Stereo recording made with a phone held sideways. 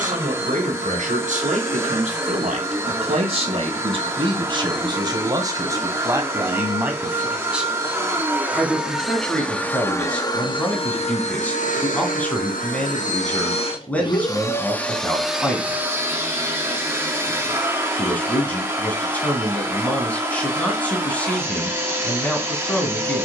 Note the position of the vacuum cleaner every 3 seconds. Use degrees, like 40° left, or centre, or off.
20° right, 20° right, 20° right, 30° left, 40° left, 10° right, 20° right, 20° right.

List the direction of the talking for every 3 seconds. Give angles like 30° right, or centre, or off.
60° right, 30° right, 10° right, 10° left, 10° left, 10° left, 10° left, 10° left.